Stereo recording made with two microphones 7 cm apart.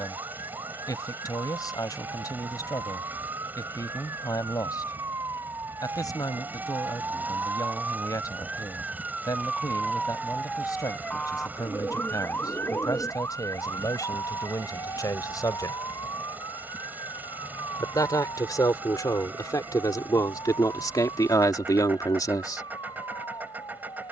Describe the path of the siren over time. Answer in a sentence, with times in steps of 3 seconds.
You can hear the siren on the right from 0 s, in the centre from 9 s and on the left from 12 s.